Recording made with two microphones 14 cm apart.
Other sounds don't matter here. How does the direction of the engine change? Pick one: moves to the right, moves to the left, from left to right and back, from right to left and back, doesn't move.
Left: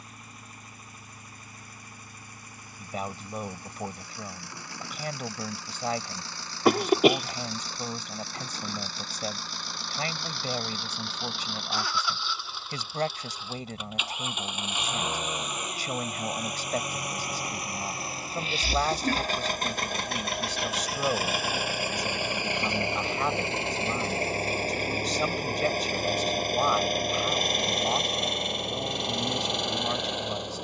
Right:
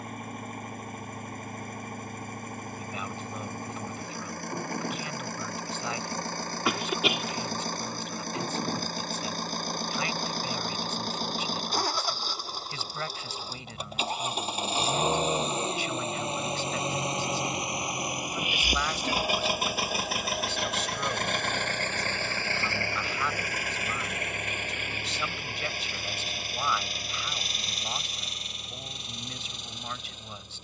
moves to the left.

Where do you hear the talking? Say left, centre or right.
left.